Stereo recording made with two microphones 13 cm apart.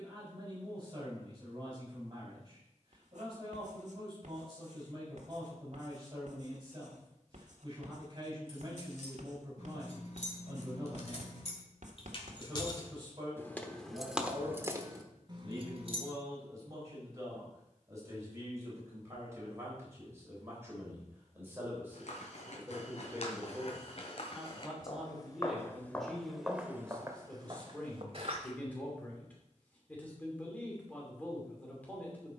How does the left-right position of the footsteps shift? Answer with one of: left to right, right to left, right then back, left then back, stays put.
left to right.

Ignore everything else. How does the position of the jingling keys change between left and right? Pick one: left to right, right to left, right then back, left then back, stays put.
left to right.